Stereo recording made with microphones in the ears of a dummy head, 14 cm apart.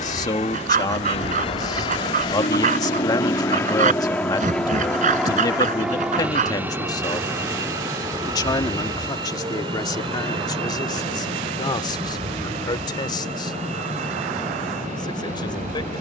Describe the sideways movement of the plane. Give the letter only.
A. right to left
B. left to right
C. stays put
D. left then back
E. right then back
B.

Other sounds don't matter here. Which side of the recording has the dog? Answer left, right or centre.
right.